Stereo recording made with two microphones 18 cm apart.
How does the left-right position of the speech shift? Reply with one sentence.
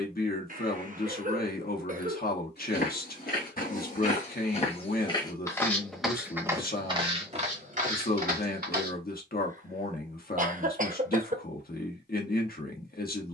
In this clip you hear the speech stay in one place.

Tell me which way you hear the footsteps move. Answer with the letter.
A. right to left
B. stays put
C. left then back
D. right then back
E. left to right
E.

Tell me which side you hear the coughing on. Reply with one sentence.
You can hear the coughing on the right.